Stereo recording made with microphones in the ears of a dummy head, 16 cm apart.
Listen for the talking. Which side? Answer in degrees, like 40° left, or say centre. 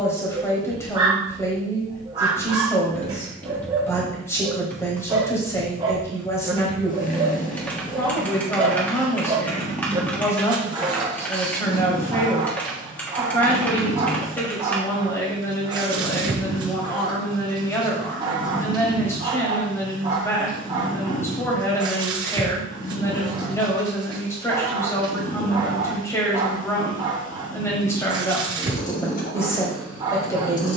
10° left.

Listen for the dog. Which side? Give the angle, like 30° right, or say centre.
20° right.